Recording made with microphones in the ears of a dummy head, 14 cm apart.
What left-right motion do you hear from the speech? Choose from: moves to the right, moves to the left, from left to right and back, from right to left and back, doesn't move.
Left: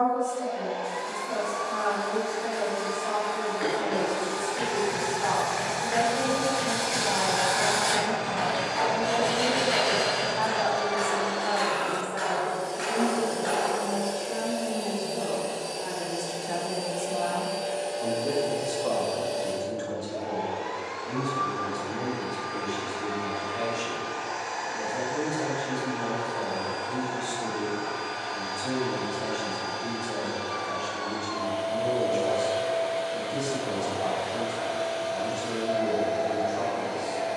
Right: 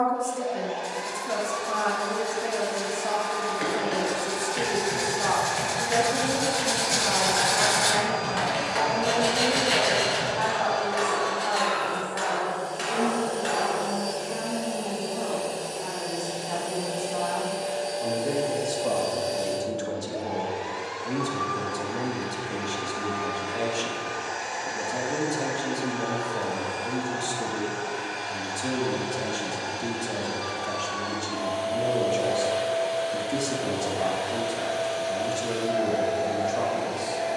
from right to left and back.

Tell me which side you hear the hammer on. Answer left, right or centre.
right.